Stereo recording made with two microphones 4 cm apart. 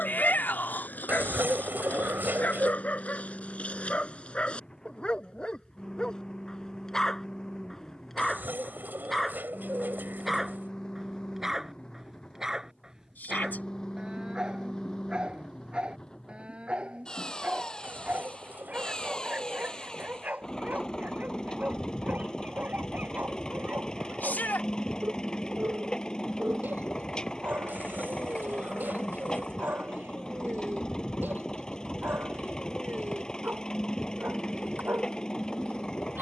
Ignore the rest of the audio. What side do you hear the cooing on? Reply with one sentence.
In this clip you hear the cooing on the right.